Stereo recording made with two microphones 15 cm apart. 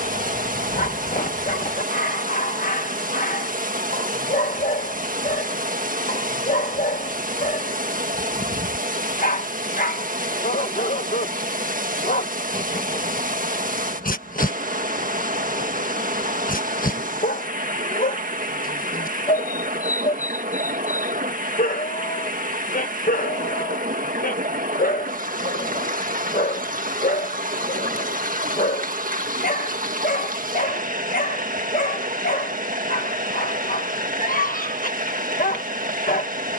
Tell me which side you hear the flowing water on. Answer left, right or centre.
right.